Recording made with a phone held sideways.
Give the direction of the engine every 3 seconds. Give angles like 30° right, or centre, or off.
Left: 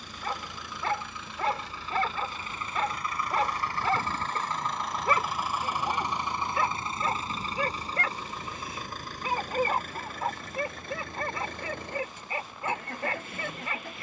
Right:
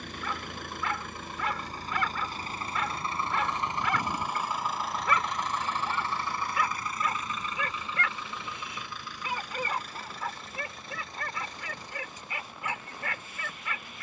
50° right, 10° right, 30° left, 50° left, 60° left.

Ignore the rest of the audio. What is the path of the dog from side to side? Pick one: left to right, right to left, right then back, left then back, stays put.
stays put.